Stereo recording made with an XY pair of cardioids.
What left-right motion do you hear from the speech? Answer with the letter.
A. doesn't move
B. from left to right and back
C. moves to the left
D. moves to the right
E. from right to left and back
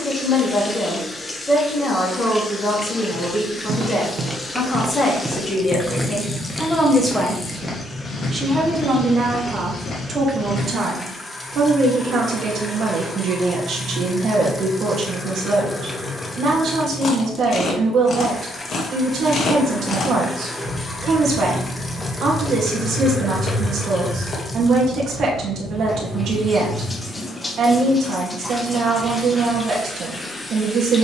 D.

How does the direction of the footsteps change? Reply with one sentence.
In this clip you hear the footsteps travel towards the left.